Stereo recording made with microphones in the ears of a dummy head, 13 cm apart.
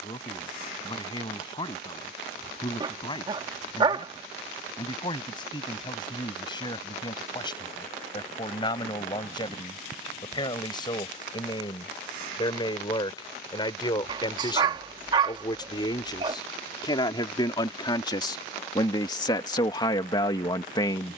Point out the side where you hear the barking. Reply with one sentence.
In this clip you hear the barking on the right.